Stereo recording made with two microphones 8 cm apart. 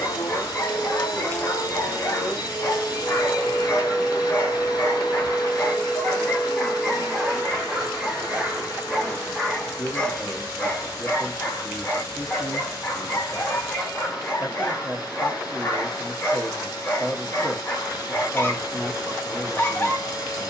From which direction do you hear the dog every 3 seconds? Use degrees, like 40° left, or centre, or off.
30° left, 30° left, centre, 20° left, 30° left, 30° left, 30° left.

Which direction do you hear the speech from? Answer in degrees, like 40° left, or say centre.
centre.